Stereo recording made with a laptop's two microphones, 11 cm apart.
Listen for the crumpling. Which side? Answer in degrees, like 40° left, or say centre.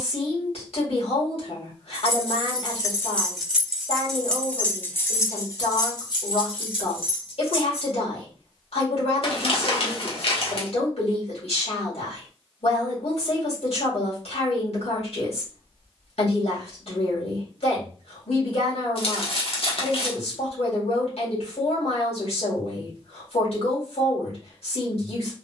60° left.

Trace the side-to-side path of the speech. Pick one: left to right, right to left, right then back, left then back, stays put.
stays put.